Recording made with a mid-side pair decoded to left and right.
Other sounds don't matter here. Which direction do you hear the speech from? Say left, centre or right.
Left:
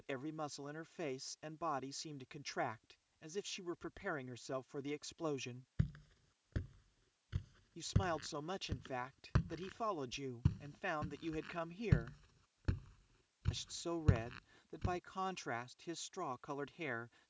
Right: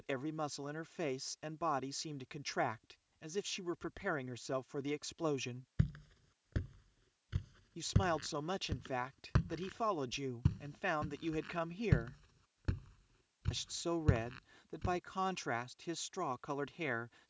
right.